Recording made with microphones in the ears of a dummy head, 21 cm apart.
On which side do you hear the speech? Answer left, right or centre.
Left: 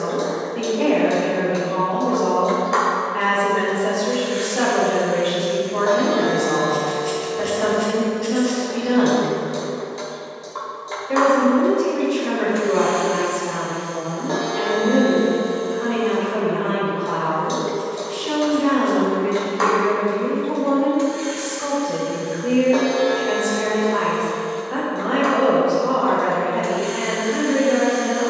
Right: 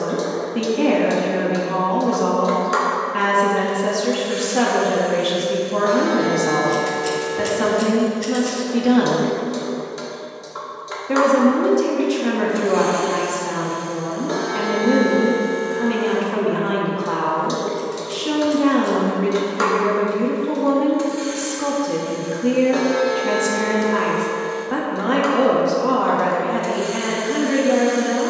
right.